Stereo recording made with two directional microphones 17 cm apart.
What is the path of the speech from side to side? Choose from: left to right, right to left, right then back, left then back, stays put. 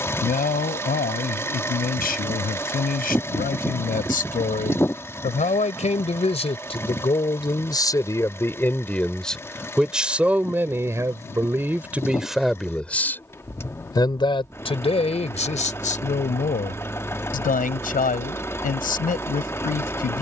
right then back.